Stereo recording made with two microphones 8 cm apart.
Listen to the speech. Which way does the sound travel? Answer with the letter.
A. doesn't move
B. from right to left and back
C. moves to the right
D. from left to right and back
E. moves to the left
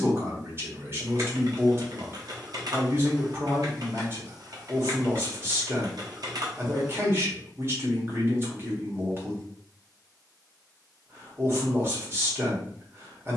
A.